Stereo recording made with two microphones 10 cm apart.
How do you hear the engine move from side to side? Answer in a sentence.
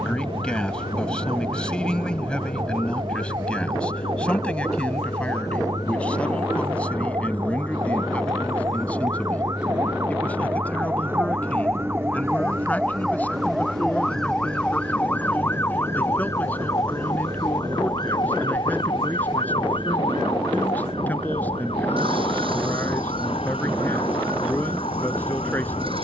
In this clip you hear the engine travel towards the right.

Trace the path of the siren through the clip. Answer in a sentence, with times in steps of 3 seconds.
You can hear the siren on the right from 0 s, in the centre from 12 s and on the left from 15 s.